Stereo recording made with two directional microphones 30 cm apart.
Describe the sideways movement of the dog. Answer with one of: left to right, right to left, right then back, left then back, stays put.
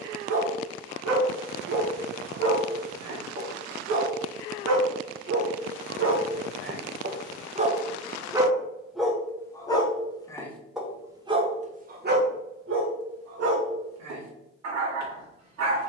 left then back.